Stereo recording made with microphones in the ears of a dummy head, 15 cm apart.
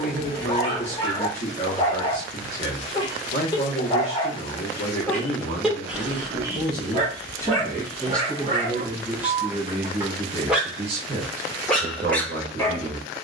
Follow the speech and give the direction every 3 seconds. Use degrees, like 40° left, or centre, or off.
40° left, 40° left, 10° left, 30° right, 40° right.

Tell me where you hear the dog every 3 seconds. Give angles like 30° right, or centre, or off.
30° left, 20° left, 30° right, 10° right, 10° left.